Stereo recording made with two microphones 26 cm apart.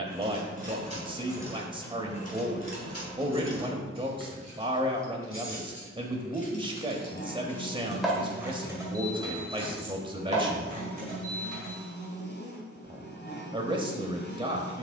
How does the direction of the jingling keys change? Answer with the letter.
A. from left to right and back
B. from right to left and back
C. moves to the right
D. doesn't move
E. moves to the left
B.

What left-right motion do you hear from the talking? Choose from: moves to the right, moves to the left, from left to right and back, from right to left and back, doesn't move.
doesn't move.